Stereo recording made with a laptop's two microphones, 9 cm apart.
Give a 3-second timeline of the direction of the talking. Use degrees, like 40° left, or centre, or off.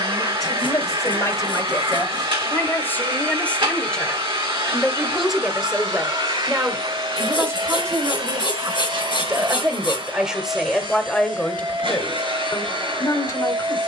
40° left, centre, 30° right, centre, 40° left.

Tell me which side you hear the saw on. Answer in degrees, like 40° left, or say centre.
60° left.